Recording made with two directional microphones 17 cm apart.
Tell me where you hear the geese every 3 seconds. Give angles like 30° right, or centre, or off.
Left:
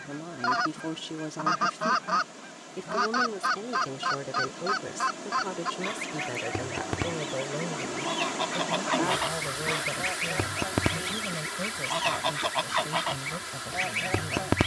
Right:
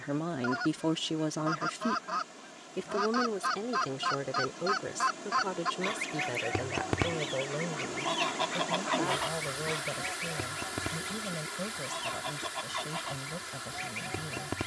50° left, 20° left, centre, 50° left, 60° left.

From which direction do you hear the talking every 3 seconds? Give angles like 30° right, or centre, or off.
20° right, centre, 10° left, 10° left, 10° left.